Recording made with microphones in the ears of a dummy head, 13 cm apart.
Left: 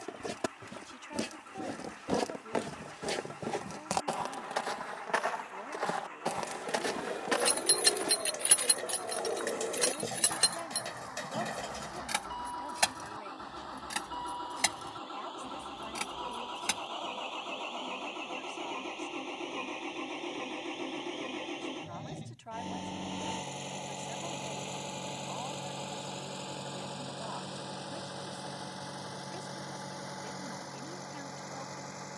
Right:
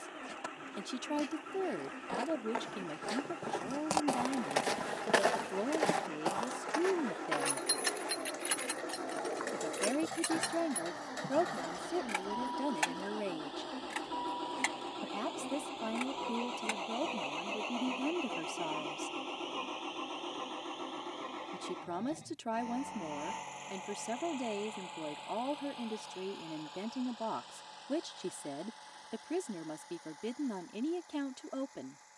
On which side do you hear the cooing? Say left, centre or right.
left.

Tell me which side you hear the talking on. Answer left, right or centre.
right.